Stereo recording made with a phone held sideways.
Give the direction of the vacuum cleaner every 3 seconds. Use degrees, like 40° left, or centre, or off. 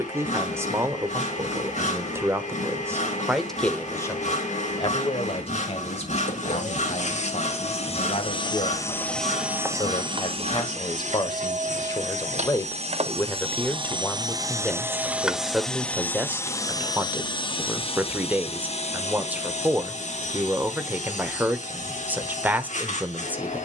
70° left, 70° left, 50° left, 40° right, 40° right, 20° left, 60° left, 60° left.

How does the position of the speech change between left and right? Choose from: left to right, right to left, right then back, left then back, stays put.
left then back.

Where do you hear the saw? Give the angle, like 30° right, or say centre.
60° left.